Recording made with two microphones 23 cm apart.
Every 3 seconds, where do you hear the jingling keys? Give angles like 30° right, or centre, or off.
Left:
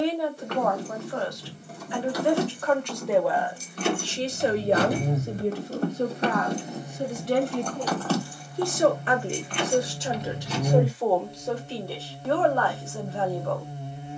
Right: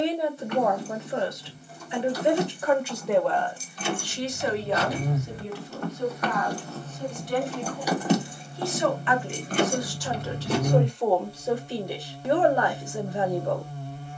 70° left, 50° left, centre, 50° right, off.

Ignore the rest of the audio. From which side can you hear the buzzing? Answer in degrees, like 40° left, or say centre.
20° left.